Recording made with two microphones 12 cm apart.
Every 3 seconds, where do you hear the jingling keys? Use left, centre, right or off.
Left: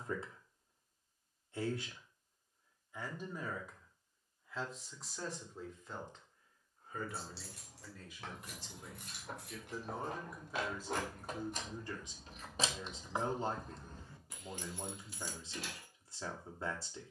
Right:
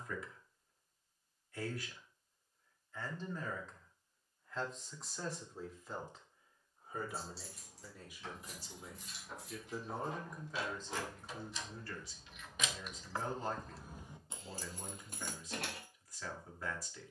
off, off, left, left, centre, right.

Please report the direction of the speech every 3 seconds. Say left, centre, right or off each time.
left, centre, centre, centre, left, left.